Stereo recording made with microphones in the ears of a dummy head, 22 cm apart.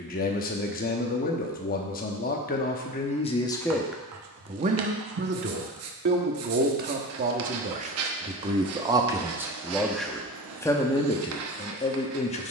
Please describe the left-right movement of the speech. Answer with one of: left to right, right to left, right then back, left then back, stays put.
right then back.